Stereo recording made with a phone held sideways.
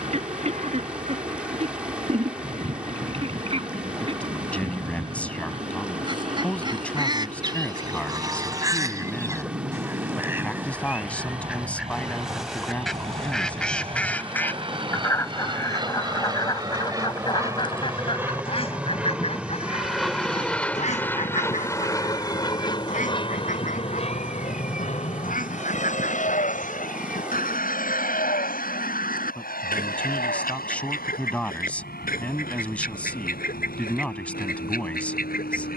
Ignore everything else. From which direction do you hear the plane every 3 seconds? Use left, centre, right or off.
right, right, right, right, right, right, centre, left, left, left, left, left.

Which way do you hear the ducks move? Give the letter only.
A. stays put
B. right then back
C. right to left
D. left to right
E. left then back
C.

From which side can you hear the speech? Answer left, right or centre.
centre.